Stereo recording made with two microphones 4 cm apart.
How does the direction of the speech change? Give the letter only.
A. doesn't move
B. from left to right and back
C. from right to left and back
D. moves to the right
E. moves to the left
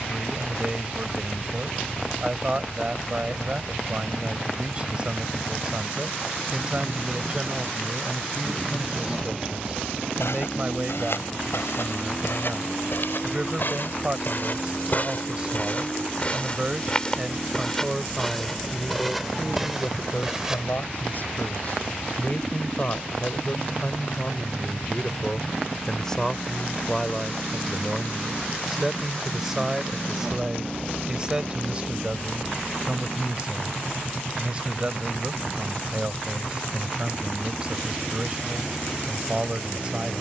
C.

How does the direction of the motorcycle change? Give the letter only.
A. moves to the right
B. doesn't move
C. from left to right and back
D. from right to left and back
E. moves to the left
B.